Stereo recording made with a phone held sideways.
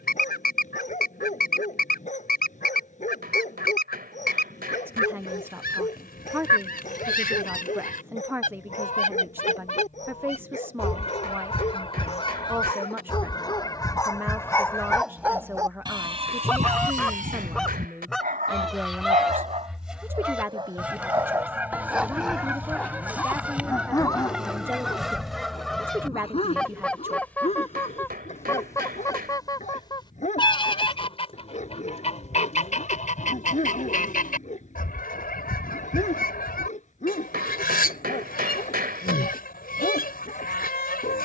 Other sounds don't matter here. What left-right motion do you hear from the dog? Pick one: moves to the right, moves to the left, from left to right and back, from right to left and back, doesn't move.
from left to right and back.